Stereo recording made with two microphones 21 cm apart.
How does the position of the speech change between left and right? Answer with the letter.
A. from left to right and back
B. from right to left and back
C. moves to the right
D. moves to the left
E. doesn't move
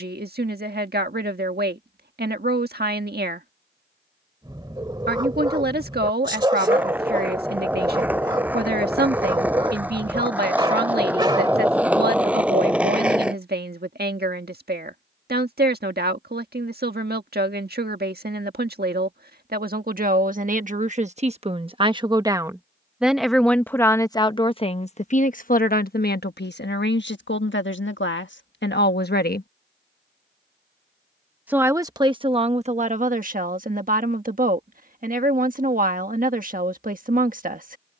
B.